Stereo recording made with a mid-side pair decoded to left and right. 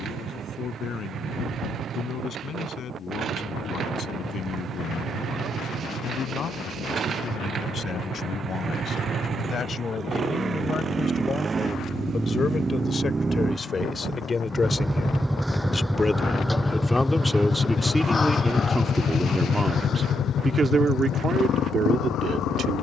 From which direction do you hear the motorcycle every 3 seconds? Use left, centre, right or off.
right, right, right, right, right, centre, left, left.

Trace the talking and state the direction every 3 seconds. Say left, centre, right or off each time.
left, left, left, left, left, centre, right, right.